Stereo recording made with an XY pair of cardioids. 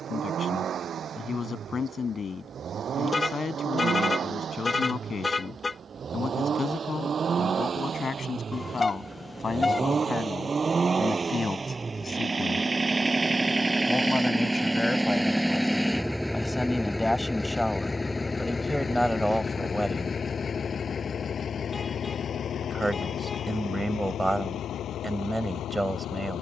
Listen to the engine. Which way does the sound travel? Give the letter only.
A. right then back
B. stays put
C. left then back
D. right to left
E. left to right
D.